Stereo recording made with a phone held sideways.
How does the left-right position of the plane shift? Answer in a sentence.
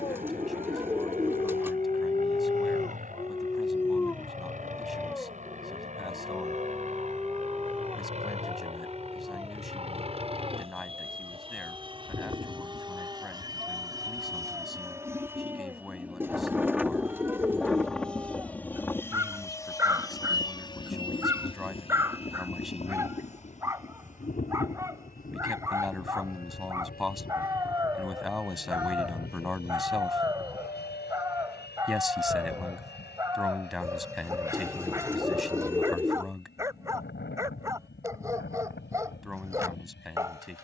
In this clip you hear the plane move to the left.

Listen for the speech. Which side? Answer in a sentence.
You can hear the speech in the centre.